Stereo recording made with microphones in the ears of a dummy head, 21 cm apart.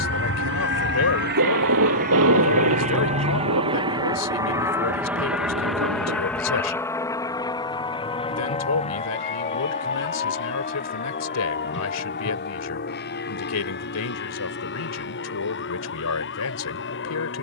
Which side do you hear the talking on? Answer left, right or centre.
left.